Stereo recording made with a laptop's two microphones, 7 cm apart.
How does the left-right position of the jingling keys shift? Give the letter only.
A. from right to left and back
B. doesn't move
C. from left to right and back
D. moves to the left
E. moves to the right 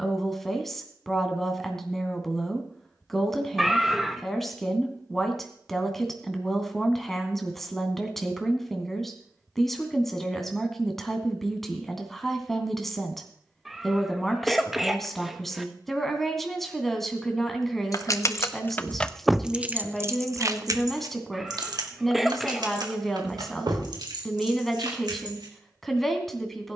E.